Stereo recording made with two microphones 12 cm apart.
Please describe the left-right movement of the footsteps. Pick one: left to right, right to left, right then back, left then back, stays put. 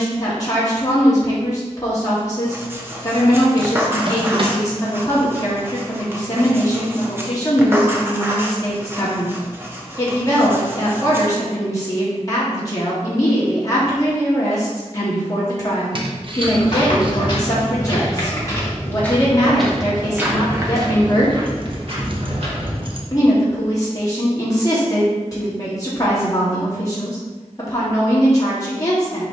left to right.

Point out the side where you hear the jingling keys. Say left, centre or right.
right.